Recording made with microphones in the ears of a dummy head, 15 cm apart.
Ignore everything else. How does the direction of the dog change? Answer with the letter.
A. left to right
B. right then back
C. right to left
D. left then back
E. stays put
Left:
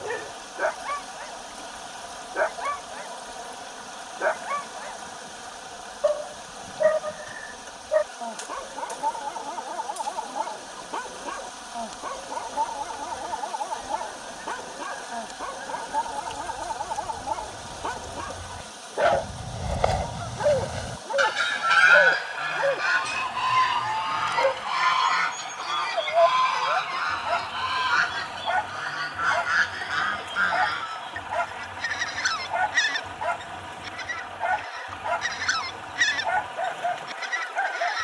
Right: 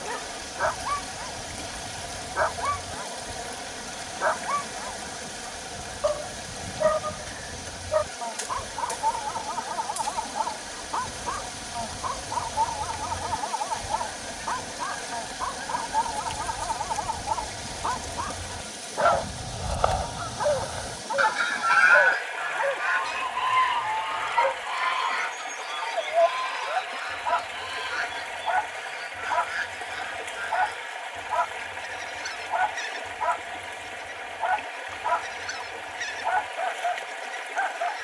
E.